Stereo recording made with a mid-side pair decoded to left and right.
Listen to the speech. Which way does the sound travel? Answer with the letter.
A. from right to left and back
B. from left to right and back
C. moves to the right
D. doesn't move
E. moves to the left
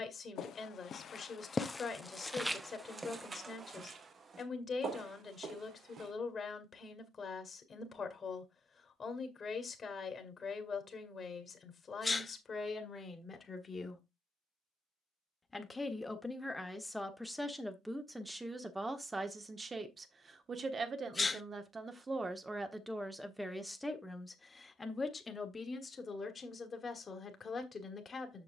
B.